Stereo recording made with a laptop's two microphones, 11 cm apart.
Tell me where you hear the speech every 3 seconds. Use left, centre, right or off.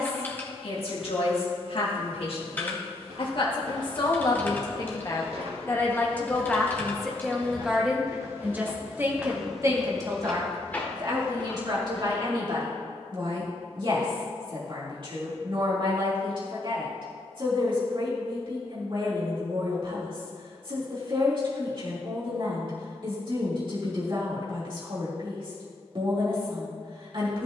left, left, centre, right, right, right, right, right, right.